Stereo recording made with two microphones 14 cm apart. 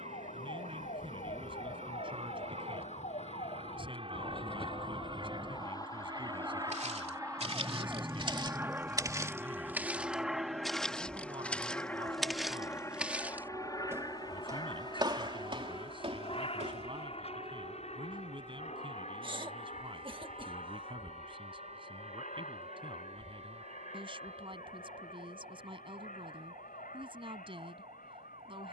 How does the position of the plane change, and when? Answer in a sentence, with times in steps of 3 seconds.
You can hear the plane on the right from 0 s, in the centre from 9 s and on the left from 12 s.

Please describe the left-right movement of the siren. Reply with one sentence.
You can hear the siren travel towards the right.